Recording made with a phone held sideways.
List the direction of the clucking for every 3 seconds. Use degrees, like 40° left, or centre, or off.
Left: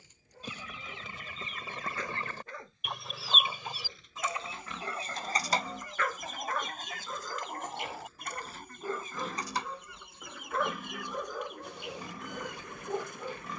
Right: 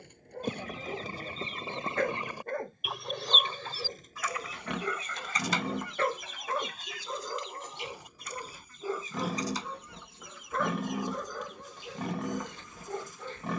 30° right, 30° left, 50° left, 60° left, 60° left.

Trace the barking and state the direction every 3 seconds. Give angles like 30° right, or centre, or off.
60° right, 40° right, 20° right, centre, 10° left.